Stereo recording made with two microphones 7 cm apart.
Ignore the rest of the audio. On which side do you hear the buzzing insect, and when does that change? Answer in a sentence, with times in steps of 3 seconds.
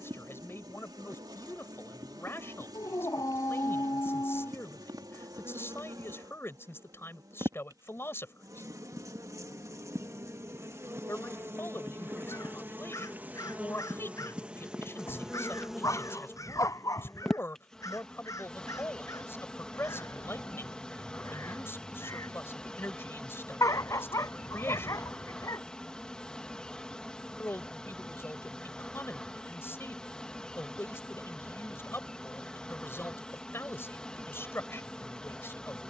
In this clip you hear the buzzing insect on the right from 0 s and in the centre from 15 s.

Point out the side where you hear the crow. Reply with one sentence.
In this clip you hear the crow on the left.